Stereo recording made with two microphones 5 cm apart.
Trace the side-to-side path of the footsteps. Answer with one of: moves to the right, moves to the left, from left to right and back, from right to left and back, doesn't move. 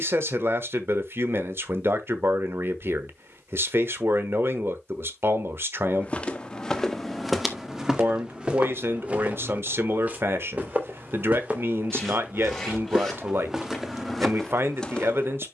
from left to right and back.